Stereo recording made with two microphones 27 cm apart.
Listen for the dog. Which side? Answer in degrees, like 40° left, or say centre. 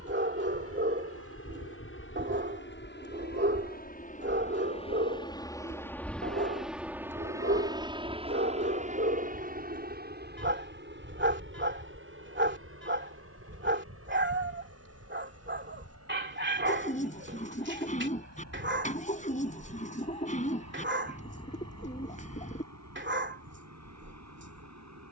40° right.